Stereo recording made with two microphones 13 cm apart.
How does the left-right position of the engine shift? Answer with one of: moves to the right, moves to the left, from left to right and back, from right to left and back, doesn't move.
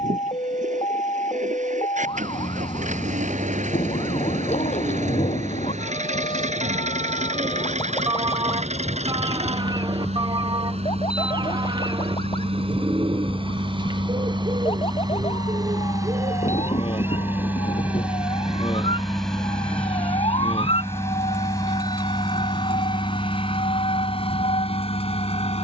moves to the left.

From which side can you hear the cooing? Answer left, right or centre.
right.